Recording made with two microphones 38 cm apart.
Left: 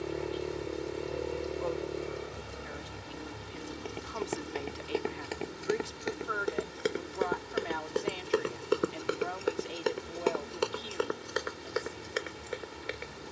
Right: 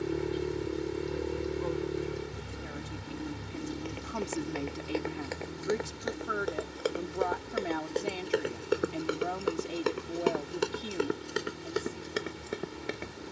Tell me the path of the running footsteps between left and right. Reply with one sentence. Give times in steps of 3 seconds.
You can hear the running footsteps not at all from 0 s, on the left from 3 s and on the right from 9 s.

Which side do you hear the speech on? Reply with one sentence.
You can hear the speech on the right.